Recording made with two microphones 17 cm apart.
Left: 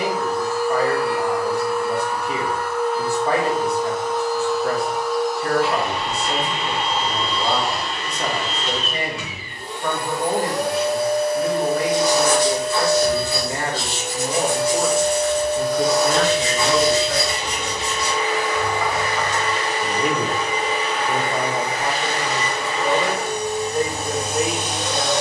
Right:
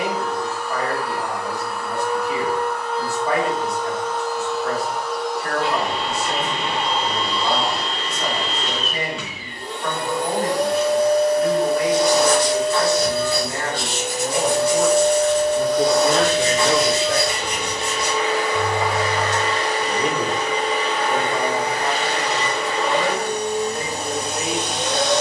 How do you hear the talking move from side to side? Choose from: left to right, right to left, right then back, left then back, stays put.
right then back.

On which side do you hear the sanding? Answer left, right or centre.
right.